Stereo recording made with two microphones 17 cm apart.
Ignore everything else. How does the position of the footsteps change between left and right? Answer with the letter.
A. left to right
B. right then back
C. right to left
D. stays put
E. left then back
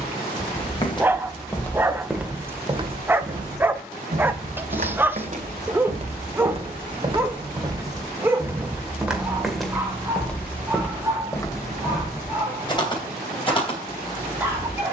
B.